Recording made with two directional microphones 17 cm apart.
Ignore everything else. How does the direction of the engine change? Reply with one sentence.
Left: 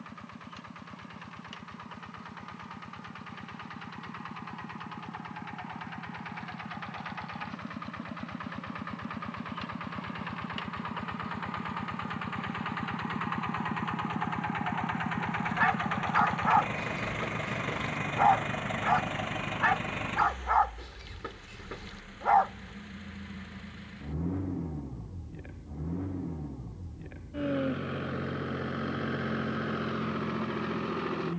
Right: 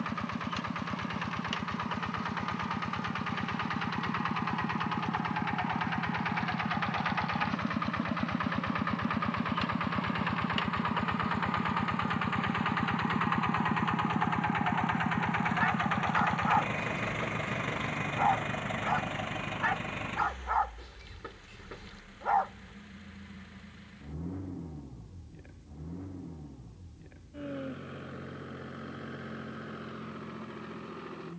In this clip you hear the engine move from right to left.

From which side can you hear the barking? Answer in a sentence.
In this clip you hear the barking on the left.